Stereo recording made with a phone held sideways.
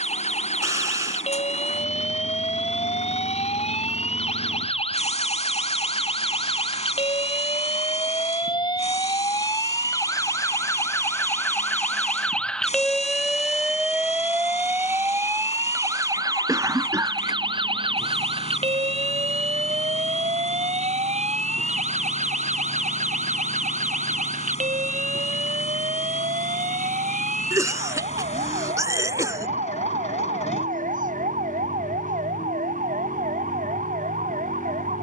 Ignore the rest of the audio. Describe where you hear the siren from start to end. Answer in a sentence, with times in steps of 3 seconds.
You can hear the siren on the left from 0 s, in the centre from 12 s and on the right from 15 s.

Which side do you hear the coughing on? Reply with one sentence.
In this clip you hear the coughing on the right.